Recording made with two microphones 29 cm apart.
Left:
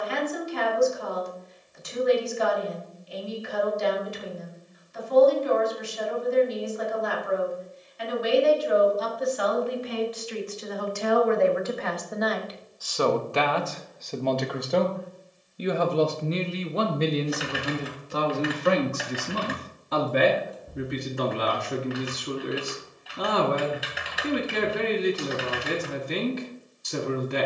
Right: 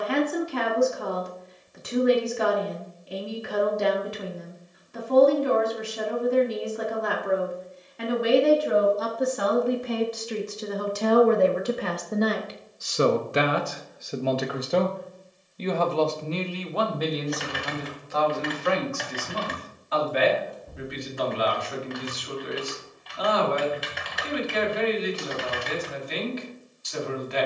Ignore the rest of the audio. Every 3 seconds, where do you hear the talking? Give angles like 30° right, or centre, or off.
70° right, 70° right, 60° right, 50° right, 20° right, 20° left, 50° left, 50° left, 50° left.